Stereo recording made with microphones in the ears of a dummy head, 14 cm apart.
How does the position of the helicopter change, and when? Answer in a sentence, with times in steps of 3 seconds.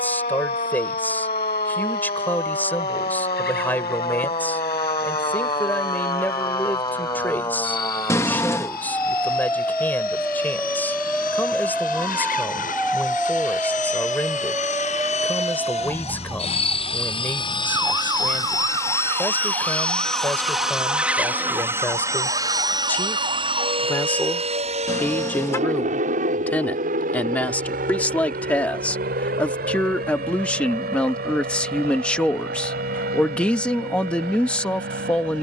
In this clip you hear the helicopter on the left from 0 s, in the centre from 18 s and on the right from 21 s.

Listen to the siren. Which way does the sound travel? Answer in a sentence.
You can hear the siren move from left to right.